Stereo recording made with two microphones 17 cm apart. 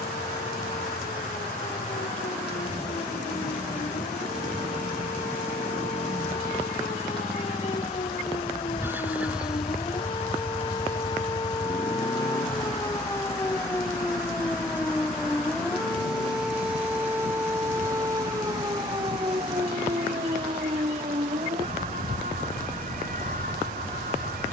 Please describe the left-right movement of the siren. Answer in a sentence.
In this clip you hear the siren travel towards the right.